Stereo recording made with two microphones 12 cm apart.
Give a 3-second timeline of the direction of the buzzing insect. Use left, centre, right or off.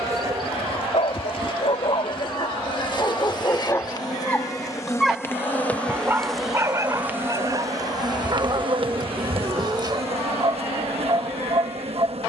left, left, right, right.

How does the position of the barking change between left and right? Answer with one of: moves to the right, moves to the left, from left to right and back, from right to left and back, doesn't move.
moves to the right.